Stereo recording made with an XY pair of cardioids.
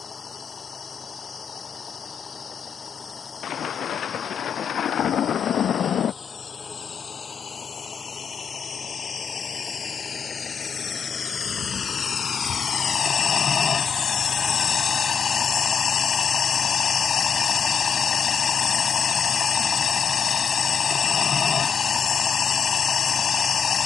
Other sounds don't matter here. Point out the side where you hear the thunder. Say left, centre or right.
left.